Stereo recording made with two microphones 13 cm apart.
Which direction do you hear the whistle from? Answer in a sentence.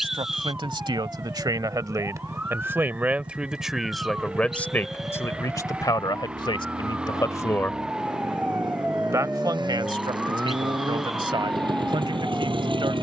You can hear the whistle in the centre.